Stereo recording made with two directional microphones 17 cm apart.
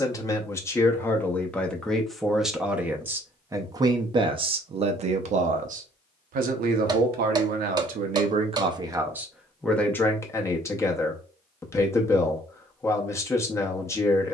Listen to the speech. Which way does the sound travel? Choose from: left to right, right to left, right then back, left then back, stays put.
right then back.